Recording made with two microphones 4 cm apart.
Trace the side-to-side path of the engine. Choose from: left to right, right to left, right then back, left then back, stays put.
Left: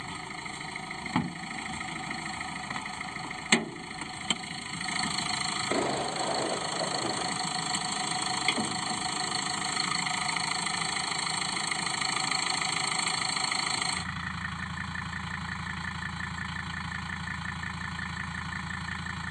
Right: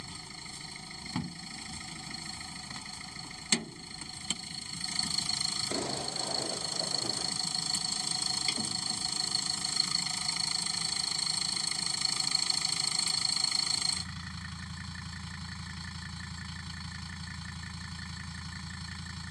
stays put.